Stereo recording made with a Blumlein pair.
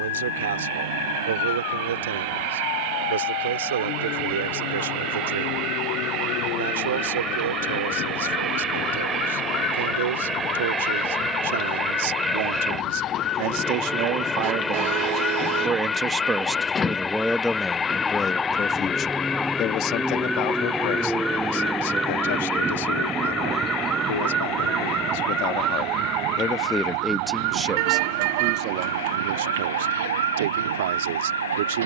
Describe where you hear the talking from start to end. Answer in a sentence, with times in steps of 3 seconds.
In this clip you hear the talking on the right from 0 s, in the centre from 15 s, on the left from 18 s and on the right from 27 s.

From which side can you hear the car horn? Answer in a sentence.
You can hear the car horn on the right.